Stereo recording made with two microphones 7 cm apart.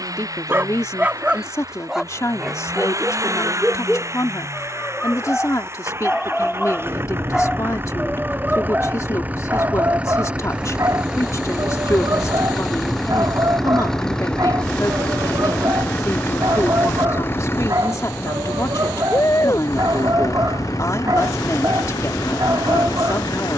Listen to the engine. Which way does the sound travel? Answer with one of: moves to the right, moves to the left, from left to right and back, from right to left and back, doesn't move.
moves to the left.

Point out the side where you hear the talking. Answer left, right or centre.
left.